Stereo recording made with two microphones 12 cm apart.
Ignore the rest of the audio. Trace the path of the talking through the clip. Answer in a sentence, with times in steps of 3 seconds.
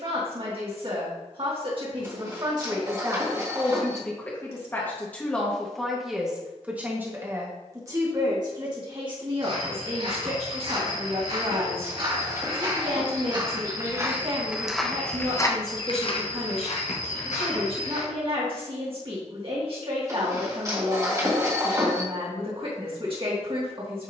In this clip you hear the talking on the right from 0 s, in the centre from 3 s and on the right from 6 s.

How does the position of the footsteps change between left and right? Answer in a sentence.
You can hear the footsteps travel towards the left.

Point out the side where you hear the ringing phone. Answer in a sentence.
In this clip you hear the ringing phone on the right.